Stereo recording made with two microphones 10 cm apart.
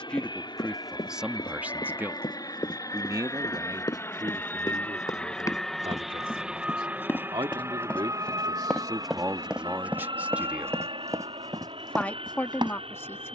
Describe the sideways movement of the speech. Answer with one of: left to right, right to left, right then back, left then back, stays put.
right then back.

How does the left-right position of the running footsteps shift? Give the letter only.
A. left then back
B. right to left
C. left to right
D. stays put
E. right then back
C.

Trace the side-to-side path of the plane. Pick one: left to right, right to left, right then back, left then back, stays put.
left to right.